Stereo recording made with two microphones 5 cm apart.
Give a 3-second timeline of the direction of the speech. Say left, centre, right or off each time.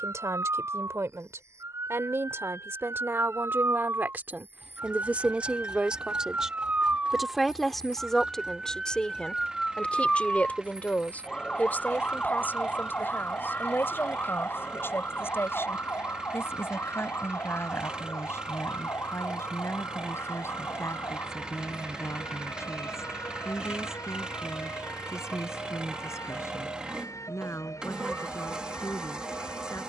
right, right, centre, left, left, left, left, left, left, left.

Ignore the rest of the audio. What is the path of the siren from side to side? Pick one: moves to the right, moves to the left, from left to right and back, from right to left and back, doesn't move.
moves to the left.